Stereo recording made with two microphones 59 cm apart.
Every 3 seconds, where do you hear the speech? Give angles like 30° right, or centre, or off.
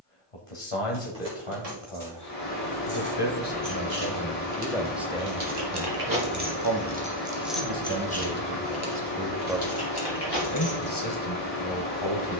60° left, 20° left, 40° right, 30° left.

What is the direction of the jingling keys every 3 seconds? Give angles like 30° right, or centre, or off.
80° right, 60° right, centre, 40° left.